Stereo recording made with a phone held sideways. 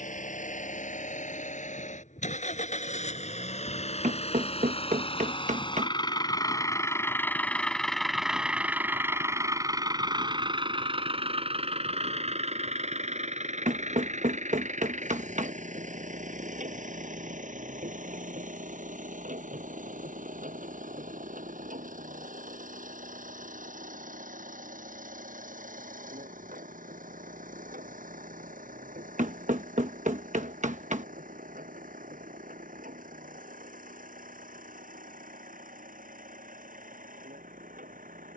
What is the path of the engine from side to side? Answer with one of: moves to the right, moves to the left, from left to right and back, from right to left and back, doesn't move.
moves to the right.